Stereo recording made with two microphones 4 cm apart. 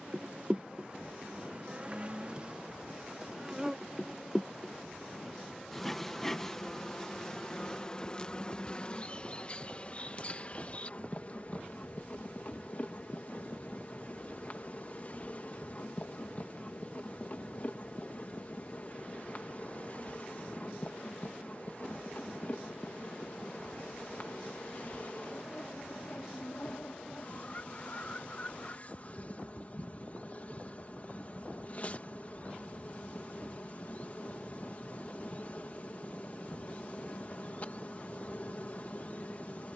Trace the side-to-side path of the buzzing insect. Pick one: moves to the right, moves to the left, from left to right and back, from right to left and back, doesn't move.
moves to the left.